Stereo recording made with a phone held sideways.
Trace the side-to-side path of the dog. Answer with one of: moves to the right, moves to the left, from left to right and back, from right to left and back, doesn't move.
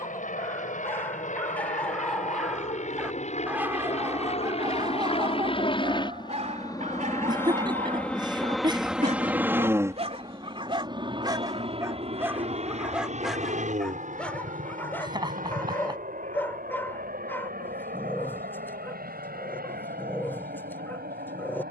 from left to right and back.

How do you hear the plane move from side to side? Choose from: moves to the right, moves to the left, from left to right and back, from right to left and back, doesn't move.
moves to the right.